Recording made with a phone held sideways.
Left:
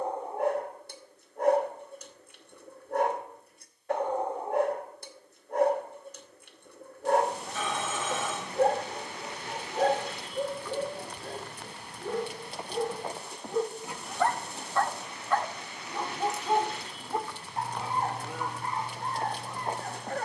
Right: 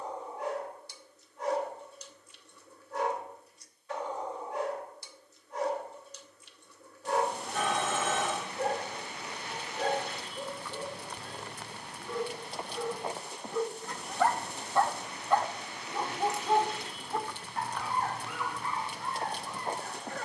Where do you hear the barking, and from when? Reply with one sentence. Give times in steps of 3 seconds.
You can hear the barking on the left from 0 s, in the centre from 15 s and on the left from 18 s.